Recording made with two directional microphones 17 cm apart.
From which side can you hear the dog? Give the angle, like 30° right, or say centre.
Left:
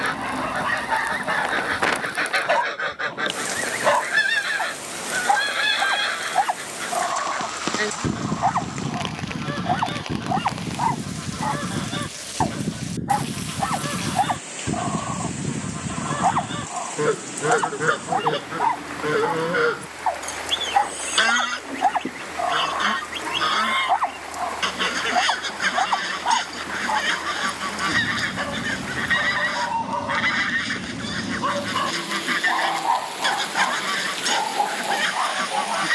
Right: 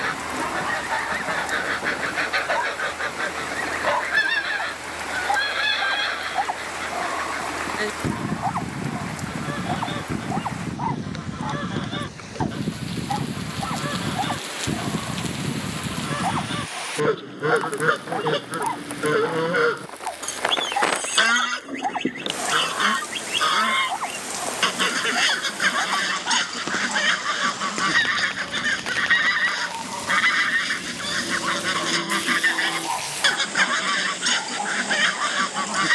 40° left.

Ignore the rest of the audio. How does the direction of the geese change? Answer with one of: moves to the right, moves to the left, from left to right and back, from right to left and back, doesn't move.
moves to the right.